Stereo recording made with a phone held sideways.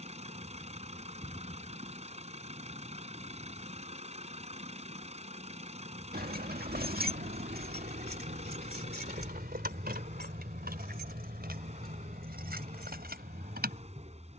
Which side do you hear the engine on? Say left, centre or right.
right.